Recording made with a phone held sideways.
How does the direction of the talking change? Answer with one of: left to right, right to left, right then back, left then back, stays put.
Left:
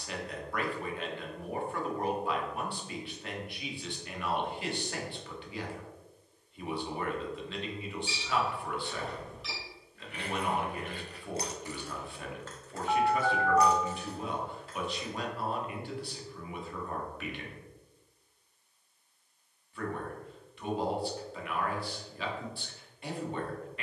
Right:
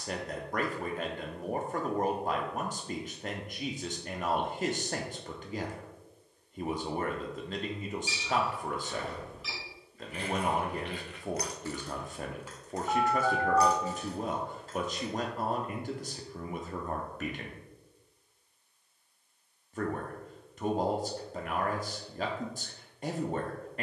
stays put.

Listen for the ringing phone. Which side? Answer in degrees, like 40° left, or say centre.
centre.